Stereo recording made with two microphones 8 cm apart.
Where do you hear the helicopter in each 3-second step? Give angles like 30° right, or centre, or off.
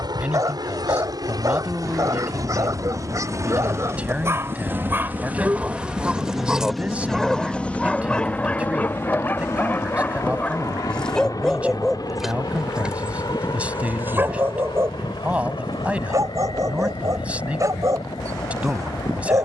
50° right, 30° right, 10° left, 40° left, 60° left, 70° left, 70° left.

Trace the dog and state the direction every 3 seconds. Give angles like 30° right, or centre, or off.
40° right, 30° right, 10° left, 20° left, 20° right, 40° right, 40° right.